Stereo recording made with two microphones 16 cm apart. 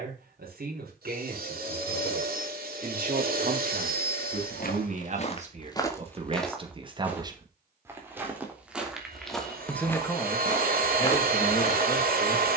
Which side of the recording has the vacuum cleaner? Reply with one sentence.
In this clip you hear the vacuum cleaner on the right.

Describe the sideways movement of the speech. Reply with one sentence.
You can hear the speech travel towards the left.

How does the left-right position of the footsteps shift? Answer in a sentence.
In this clip you hear the footsteps move from left to right and back again.